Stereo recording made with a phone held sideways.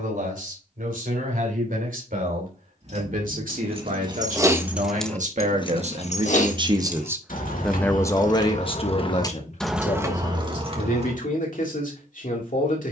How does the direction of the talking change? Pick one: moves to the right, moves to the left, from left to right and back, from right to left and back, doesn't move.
moves to the left.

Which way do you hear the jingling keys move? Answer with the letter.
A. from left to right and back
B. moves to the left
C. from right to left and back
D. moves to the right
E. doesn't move
C.